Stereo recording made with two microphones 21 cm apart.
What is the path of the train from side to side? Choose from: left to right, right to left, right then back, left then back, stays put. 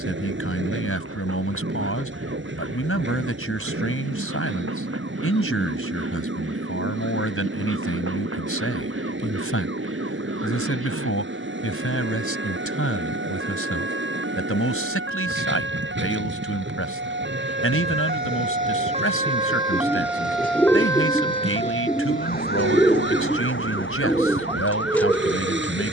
stays put.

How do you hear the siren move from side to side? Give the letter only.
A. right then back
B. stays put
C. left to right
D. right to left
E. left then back
D.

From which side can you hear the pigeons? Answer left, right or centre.
centre.